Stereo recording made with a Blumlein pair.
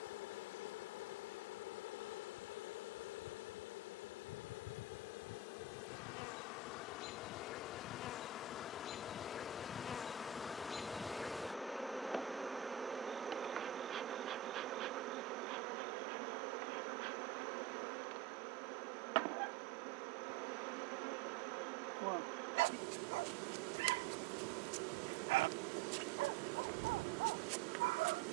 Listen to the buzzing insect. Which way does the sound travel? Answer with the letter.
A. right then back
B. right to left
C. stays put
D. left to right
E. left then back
D.